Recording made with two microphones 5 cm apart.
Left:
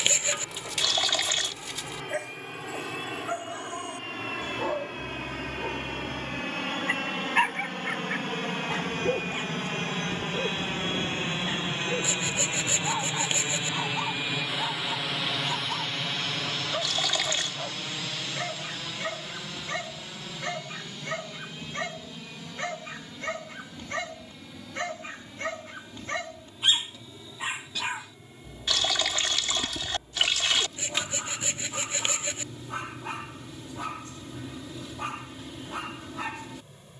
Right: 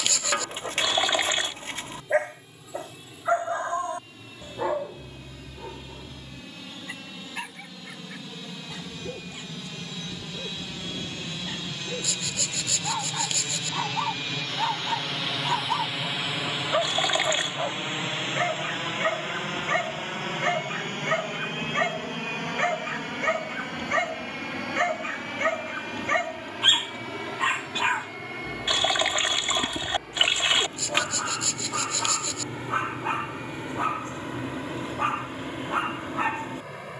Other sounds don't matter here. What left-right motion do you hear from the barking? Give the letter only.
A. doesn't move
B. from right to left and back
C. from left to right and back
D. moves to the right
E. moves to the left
B.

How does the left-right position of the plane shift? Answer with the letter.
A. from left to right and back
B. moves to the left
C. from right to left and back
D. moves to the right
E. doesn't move
D.